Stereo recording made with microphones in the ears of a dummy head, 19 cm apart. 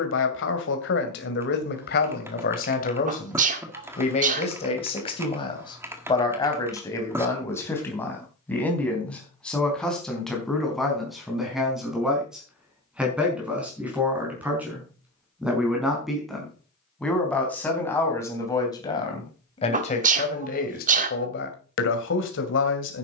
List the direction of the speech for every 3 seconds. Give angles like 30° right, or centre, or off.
50° left, 30° left, 10° left, centre, 10° right, centre, 30° left, 60° left.